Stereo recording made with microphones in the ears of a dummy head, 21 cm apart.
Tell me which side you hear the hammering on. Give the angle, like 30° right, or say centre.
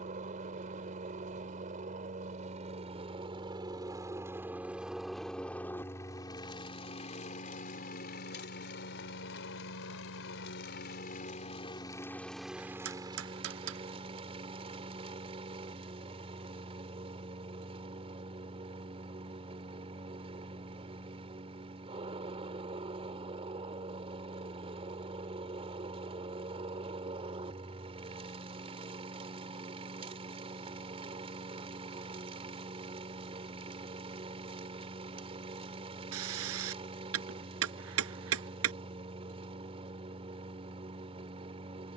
70° right.